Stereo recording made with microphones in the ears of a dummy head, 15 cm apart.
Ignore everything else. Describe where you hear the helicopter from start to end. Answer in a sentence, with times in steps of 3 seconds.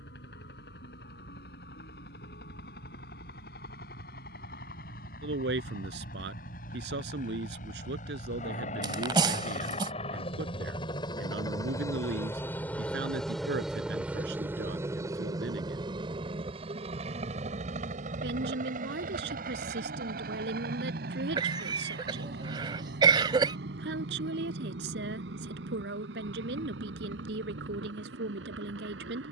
In this clip you hear the helicopter on the left from 0 s, in the centre from 12 s and on the right from 15 s.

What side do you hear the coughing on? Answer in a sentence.
You can hear the coughing on the right.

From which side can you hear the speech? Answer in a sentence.
You can hear the speech on the right.